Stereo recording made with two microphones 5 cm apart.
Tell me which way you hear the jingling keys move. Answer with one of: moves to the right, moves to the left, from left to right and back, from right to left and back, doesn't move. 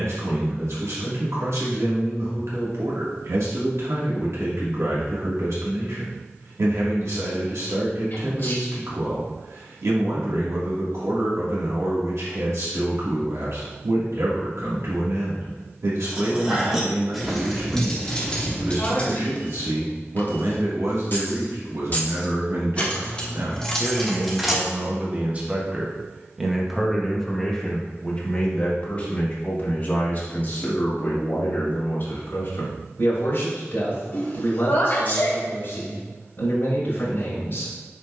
from right to left and back.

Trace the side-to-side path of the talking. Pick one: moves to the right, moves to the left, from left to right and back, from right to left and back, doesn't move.
moves to the left.